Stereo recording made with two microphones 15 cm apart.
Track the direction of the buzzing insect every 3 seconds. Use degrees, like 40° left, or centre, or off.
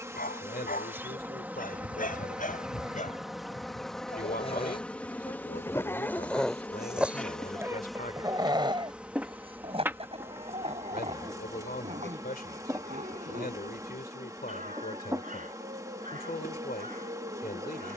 10° right, 10° left, centre, 20° right, 20° right, 20° right.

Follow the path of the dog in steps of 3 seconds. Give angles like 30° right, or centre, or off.
70° left, 40° left, 10° right, 40° right, 60° right, 60° right.